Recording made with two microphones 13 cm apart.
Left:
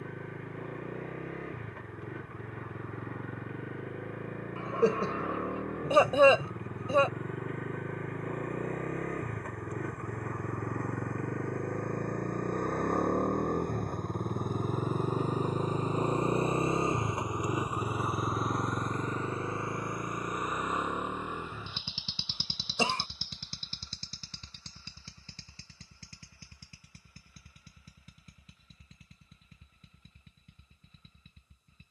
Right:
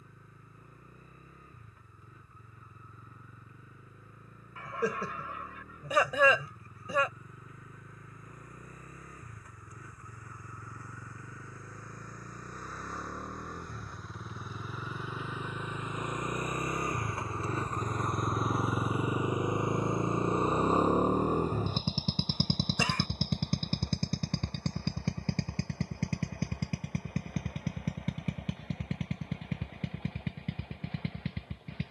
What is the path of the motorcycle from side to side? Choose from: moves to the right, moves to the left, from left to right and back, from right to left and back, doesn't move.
moves to the right.